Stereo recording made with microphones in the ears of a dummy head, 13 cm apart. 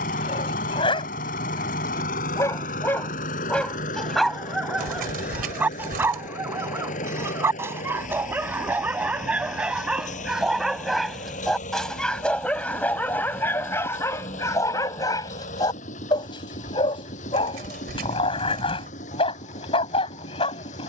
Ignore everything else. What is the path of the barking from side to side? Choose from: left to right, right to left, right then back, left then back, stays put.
right then back.